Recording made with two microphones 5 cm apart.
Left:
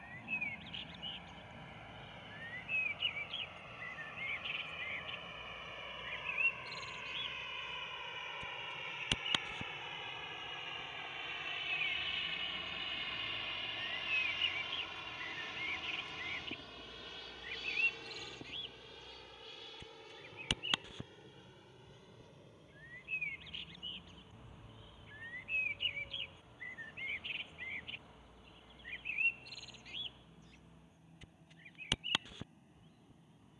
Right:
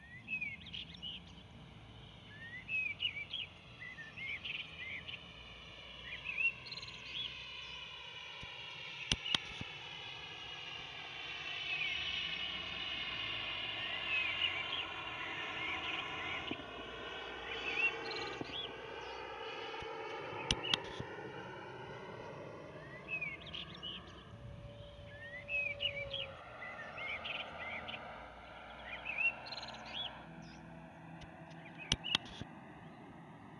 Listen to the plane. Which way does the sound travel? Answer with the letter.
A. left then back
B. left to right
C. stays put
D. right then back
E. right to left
B.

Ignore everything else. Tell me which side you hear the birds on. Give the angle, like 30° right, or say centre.
10° left.